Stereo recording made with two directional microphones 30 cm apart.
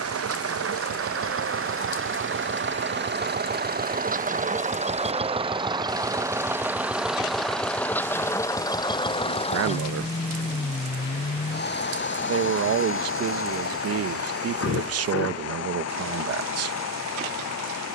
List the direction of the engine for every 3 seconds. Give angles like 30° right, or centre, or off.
40° right, 20° right, centre, 20° left, 40° left, 50° left.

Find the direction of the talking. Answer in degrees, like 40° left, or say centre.
50° right.